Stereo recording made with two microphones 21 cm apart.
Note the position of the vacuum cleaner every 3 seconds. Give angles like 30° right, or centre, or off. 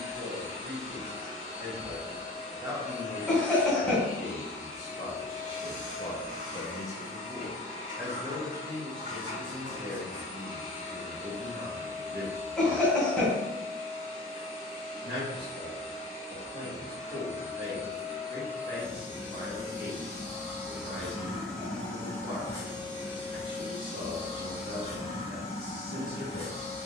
40° right, 40° right, 40° right, 40° right, 40° right, 30° right, 20° right, 10° left, 30° left.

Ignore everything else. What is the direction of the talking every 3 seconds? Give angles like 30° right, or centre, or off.
40° right, 40° left, centre, 40° right, 50° right, 50° right, 50° right, 50° right, 50° right.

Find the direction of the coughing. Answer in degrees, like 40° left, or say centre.
centre.